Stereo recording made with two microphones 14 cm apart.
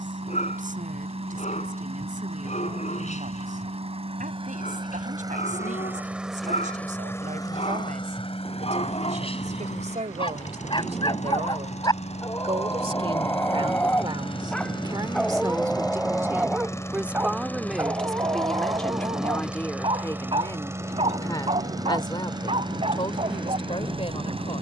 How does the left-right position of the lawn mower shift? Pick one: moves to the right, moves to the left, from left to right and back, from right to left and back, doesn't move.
from right to left and back.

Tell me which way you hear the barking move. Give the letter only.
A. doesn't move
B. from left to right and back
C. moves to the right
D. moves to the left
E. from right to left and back
C.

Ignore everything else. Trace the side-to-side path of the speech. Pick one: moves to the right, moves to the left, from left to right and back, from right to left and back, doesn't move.
moves to the left.